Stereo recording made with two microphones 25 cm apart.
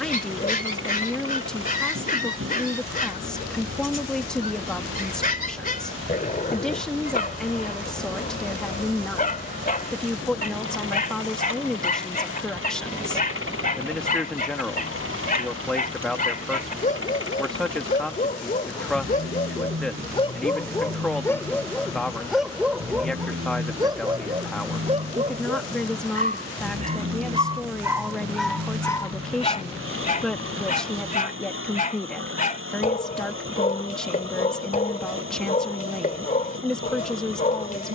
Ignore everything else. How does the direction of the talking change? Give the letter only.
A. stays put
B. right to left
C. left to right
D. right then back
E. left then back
A.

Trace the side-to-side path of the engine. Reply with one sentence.
You can hear the engine stay in one place.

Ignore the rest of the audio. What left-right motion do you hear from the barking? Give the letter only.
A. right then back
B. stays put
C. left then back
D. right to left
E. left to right
A.